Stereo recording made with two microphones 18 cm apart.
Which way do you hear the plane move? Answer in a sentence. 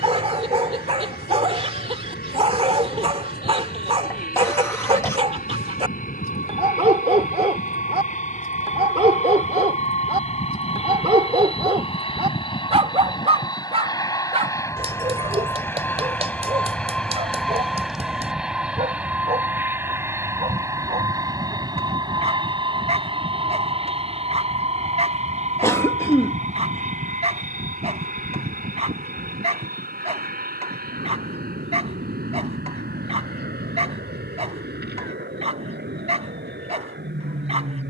In this clip you hear the plane move to the right.